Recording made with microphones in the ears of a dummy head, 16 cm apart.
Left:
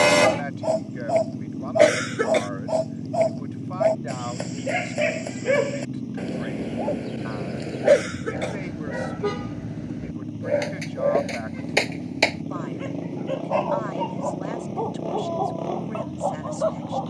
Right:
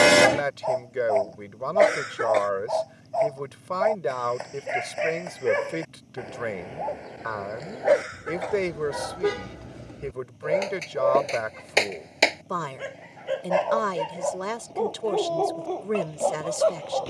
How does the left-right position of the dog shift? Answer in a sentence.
You can hear the dog move from left to right.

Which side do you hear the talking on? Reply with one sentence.
You can hear the talking on the right.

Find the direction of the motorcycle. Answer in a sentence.
You can hear the motorcycle on the left.